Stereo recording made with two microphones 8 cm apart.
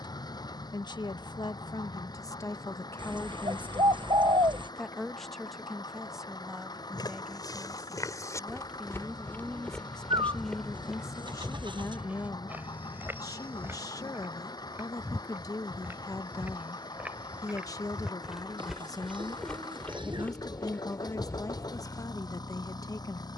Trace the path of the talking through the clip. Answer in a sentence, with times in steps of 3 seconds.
In this clip you hear the talking on the left from 0 s, in the centre from 3 s and on the left from 9 s.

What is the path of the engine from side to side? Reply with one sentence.
In this clip you hear the engine stay in one place.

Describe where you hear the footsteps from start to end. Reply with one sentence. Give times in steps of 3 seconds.
In this clip you hear the footsteps not at all from 0 s, on the left from 6 s, in the centre from 9 s, on the right from 12 s, in the centre from 18 s and on the left from 21 s.